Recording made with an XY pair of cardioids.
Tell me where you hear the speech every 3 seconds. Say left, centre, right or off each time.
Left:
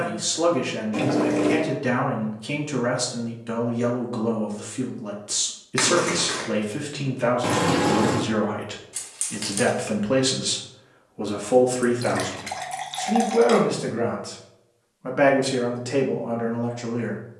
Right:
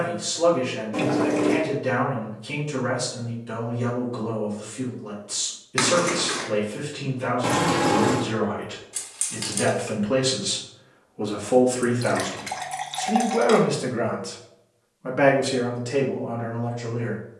left, left, left, left, centre, left.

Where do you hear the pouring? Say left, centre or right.
centre.